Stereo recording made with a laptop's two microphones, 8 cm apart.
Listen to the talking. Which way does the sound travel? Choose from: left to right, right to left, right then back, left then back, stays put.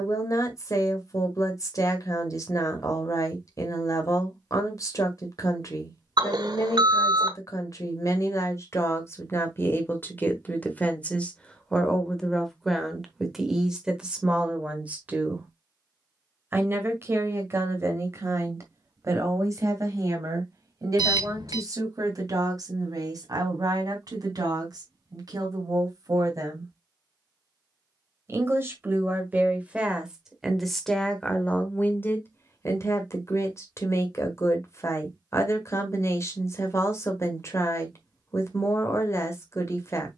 right then back.